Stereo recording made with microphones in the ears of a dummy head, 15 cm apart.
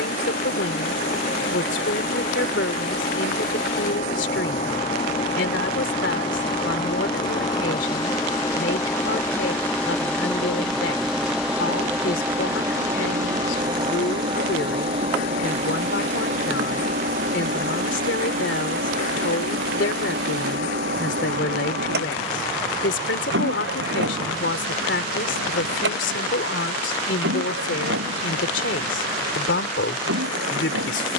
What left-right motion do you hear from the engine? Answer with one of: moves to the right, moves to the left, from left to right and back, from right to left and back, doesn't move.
moves to the right.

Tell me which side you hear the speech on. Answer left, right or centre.
left.